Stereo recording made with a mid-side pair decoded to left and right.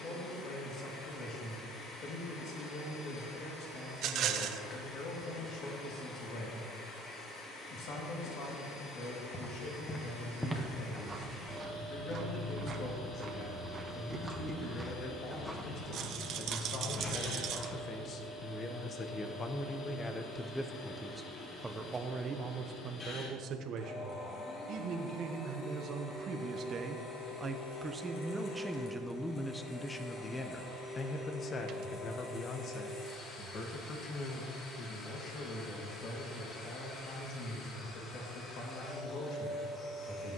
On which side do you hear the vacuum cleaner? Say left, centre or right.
left.